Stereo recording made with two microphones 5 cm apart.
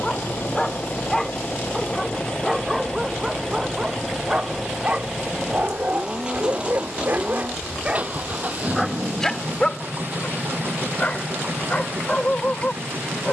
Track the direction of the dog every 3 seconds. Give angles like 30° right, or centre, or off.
centre, 20° right, 30° right, 20° left, 30° left.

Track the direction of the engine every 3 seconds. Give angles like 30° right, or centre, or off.
30° left, centre, 30° right, 40° right, 50° right.